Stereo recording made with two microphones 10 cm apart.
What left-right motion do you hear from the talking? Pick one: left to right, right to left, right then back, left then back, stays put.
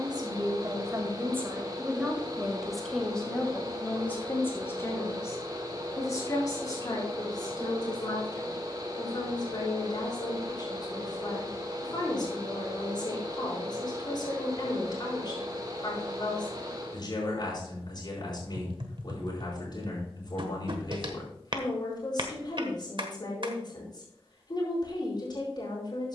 right to left.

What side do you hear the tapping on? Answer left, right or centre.
right.